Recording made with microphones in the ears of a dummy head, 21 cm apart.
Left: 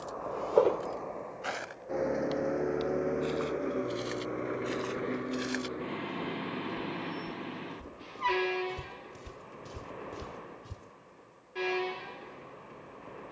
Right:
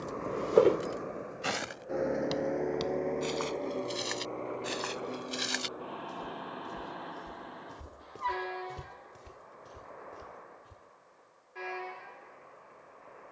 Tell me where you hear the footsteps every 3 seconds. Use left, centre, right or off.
right, right, right, left, off.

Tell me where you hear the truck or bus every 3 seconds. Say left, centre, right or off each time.
centre, left, left, left, left.